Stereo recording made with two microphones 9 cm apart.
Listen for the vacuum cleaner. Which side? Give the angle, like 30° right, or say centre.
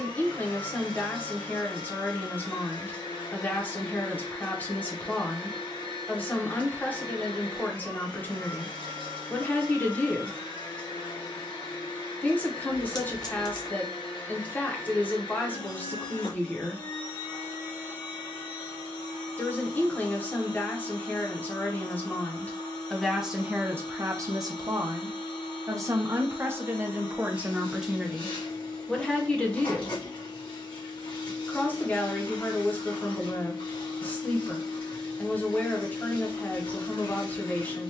70° left.